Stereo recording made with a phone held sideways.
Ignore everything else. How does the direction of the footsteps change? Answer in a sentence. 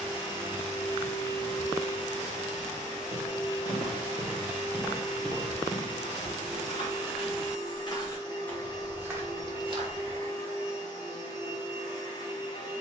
You can hear the footsteps move from right to left and back again.